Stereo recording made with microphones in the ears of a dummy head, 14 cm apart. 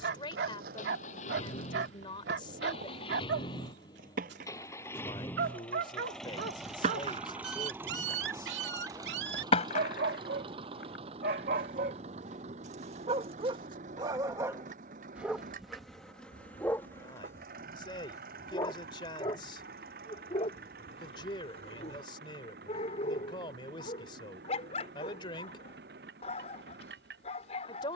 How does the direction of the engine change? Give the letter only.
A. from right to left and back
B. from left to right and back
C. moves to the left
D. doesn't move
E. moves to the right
E.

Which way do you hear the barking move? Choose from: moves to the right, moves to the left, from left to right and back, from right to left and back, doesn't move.
moves to the left.